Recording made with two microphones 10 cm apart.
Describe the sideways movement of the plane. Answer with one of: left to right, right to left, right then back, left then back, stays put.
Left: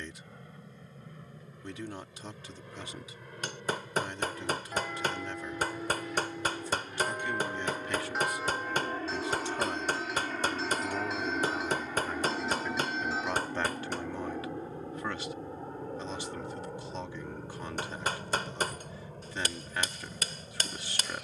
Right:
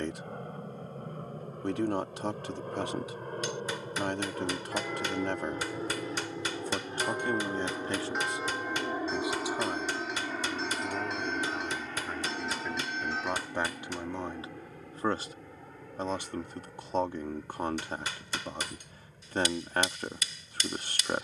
right to left.